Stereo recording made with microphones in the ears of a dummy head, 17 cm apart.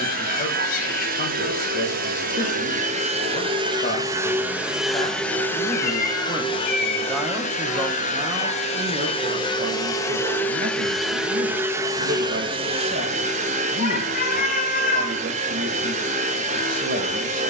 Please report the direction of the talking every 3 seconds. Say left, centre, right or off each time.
left, left, centre, right, right, right.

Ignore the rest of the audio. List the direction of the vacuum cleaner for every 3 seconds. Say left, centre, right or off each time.
right, centre, left, centre, right, right.